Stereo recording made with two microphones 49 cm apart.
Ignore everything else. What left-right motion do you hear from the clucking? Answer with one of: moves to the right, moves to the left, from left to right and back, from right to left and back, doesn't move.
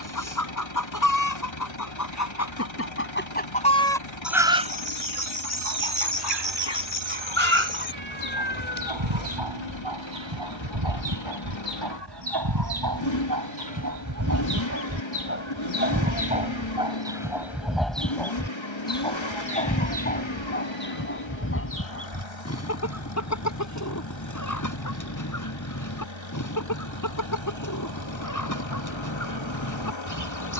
from left to right and back.